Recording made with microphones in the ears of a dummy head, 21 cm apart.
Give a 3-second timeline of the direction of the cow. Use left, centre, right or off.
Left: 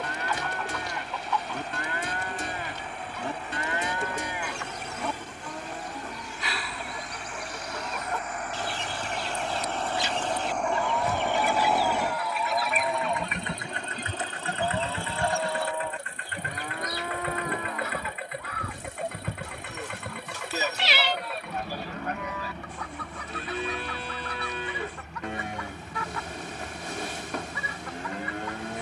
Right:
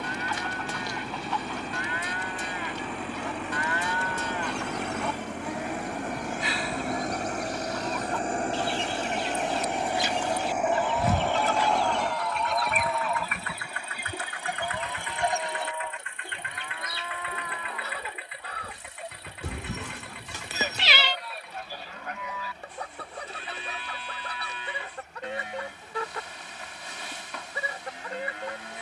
left, centre, right, right, left, left, left, left, left, left.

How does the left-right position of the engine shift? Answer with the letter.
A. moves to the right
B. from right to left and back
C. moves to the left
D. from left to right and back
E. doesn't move
C.